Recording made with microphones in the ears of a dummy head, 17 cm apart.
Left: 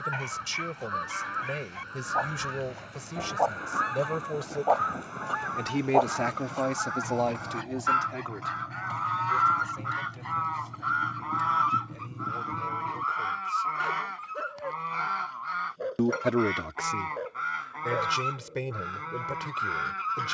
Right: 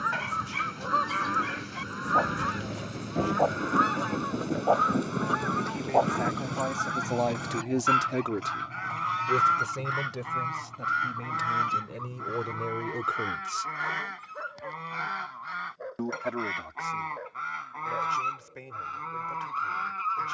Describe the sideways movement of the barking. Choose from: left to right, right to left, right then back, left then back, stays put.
right to left.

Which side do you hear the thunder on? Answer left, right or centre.
right.